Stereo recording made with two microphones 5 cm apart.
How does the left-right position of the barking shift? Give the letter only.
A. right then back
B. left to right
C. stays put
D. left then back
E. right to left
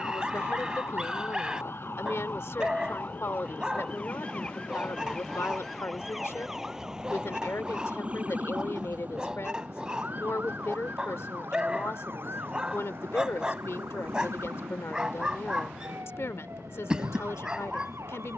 C.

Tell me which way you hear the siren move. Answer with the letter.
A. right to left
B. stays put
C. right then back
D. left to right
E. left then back
D.